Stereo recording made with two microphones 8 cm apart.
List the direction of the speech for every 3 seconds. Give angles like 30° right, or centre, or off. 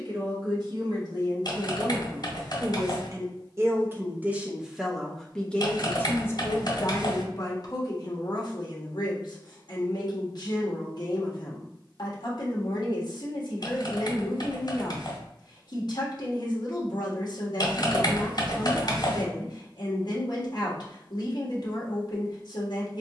50° right, 10° right, 40° left, 60° left, 60° left, 60° left, 60° left, 60° left.